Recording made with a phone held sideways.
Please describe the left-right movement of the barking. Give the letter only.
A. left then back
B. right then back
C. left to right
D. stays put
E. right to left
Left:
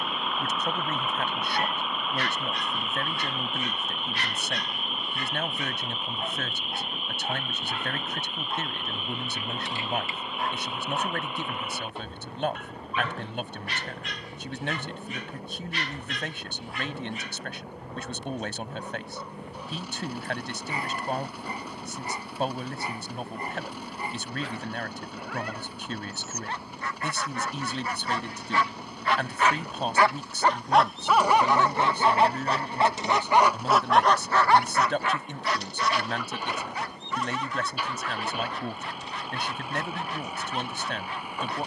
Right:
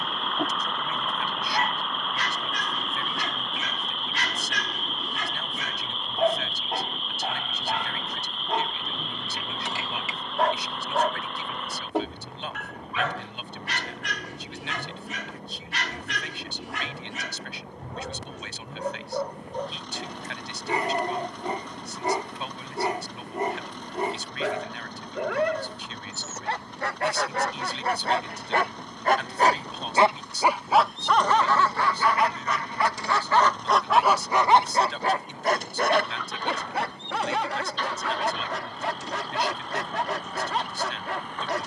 A.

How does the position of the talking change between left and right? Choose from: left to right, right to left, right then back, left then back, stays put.
stays put.